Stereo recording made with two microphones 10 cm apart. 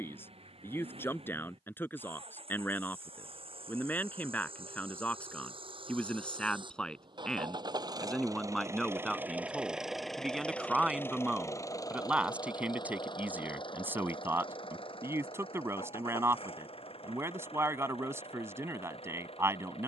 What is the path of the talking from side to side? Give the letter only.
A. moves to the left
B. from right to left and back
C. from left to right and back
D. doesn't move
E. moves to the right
E.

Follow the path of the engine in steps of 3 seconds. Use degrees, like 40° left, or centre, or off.
80° right, 70° right, 50° right, 10° left, 50° left, 70° left, 70° left.